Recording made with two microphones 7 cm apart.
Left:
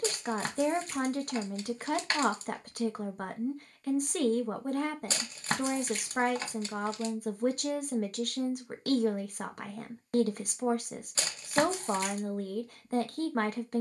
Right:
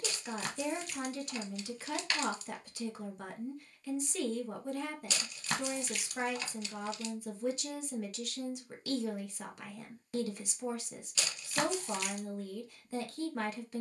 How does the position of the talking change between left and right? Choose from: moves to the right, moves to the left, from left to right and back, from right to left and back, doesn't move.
doesn't move.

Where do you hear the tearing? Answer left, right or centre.
left.